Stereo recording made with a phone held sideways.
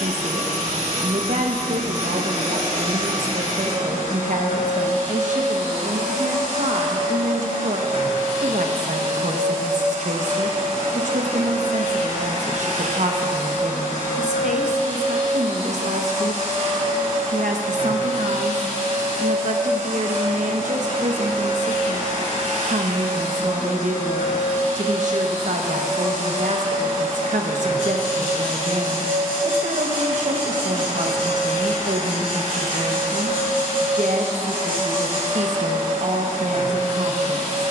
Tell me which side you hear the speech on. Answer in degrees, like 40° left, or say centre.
60° right.